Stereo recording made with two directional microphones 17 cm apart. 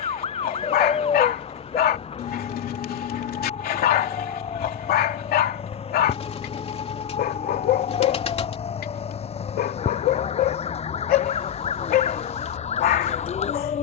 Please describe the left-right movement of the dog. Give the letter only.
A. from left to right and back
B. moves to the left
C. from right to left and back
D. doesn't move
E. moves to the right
D.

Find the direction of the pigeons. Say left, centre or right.
left.